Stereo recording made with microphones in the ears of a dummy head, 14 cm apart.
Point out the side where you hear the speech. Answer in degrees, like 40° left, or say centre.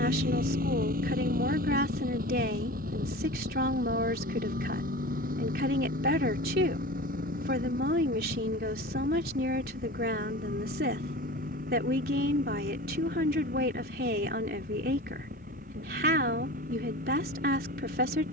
60° right.